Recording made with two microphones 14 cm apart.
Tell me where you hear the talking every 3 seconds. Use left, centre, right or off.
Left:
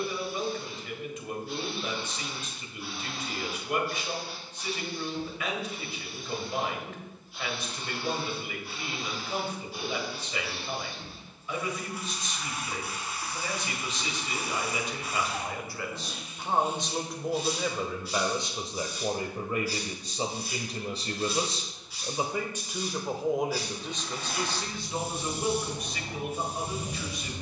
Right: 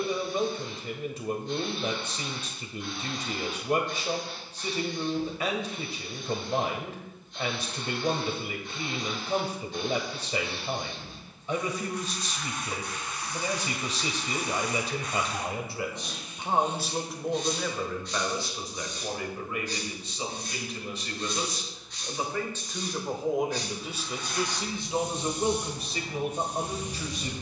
right, right, right, right, right, centre, left, centre, right.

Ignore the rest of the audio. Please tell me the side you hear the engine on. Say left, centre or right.
left.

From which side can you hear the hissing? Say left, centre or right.
centre.